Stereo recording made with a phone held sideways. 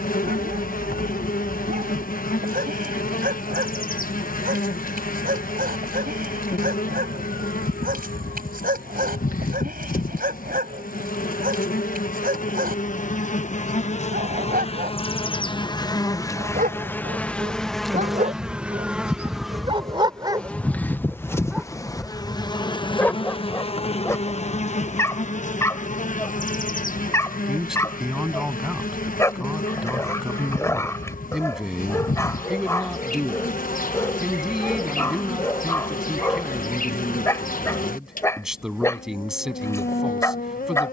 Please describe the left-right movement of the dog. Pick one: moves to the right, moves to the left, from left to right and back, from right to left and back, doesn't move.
moves to the left.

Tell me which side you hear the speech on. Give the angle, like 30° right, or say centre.
centre.